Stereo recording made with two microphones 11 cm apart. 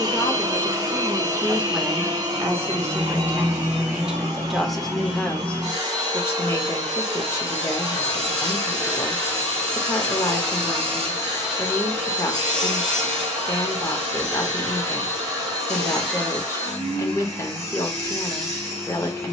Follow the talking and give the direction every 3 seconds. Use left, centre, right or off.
centre, centre, left, left, left, left, left.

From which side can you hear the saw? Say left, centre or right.
right.